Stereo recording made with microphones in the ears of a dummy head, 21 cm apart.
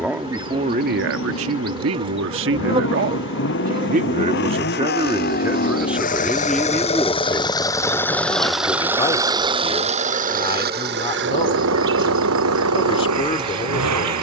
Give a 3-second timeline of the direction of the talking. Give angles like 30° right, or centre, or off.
50° right, 20° right, 10° left, 20° left, 20° left.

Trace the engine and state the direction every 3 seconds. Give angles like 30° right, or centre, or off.
60° left, 50° left, 20° left, 40° right, 70° right.